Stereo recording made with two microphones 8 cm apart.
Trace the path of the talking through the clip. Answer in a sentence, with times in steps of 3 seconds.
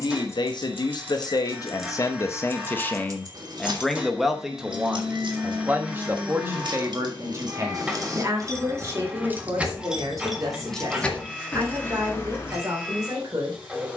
In this clip you hear the talking on the left from 0 s, in the centre from 3 s and on the right from 6 s.